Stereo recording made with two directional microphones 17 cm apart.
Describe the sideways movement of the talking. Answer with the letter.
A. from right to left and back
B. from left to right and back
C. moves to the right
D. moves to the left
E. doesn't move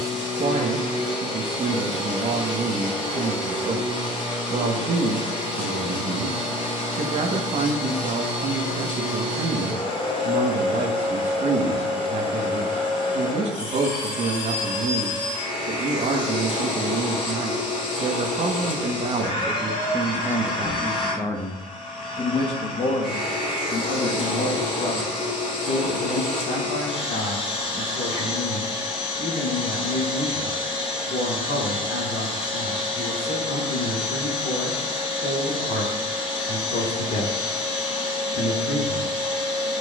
D.